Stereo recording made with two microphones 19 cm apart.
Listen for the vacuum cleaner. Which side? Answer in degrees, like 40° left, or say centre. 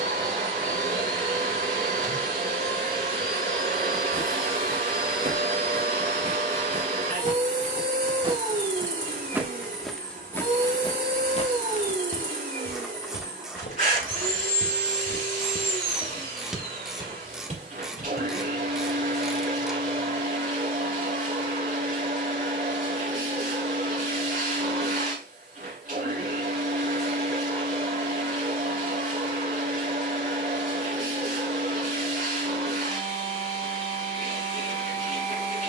50° right.